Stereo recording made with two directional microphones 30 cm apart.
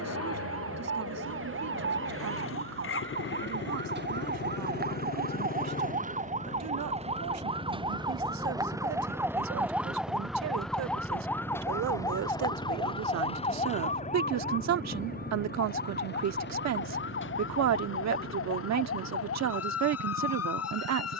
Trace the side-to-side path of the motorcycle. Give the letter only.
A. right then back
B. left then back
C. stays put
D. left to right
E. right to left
D.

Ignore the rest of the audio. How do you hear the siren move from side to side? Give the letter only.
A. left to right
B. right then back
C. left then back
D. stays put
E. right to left
E.